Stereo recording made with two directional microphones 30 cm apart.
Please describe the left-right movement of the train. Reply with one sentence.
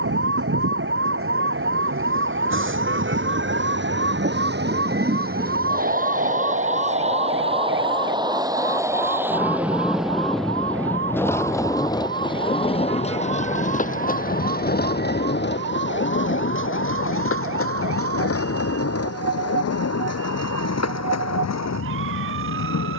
You can hear the train go from the right side to the left.